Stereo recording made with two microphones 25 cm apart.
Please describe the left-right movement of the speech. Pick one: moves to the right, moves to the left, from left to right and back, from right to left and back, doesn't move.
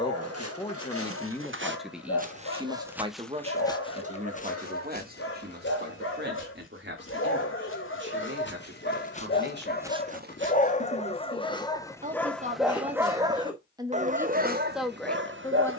from left to right and back.